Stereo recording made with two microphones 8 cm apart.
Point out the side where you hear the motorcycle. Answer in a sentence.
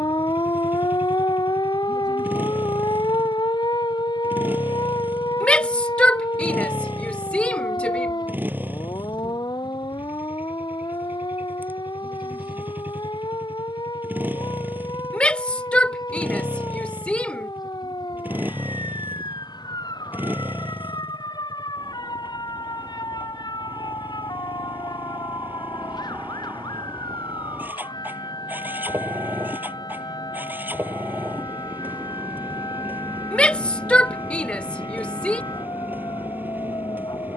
You can hear the motorcycle on the right.